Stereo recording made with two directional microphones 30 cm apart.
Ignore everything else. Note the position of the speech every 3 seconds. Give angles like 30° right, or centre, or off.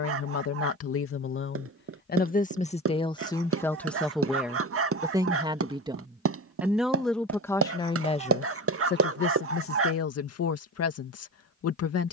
40° left, centre, 10° left, 50° left.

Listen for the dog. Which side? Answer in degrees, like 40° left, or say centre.
50° right.